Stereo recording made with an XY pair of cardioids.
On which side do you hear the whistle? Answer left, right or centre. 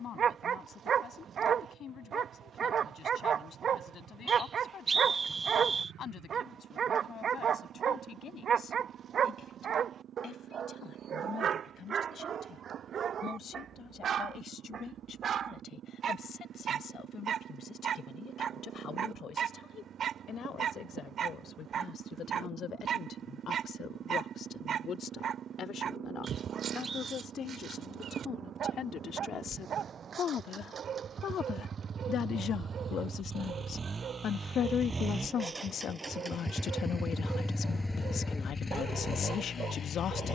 right.